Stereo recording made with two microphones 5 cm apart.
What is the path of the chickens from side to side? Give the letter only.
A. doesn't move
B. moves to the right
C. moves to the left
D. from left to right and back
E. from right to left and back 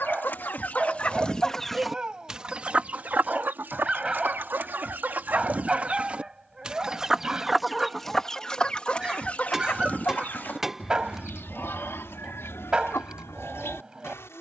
D.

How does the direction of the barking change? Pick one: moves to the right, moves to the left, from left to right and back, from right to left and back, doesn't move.
doesn't move.